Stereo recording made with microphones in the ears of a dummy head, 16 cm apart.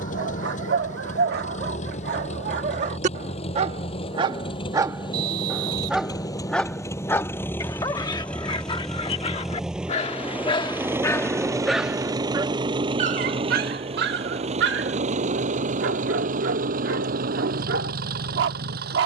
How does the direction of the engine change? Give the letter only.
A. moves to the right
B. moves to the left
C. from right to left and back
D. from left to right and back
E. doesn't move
A.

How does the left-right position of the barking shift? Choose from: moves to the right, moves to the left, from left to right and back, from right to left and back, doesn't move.
from right to left and back.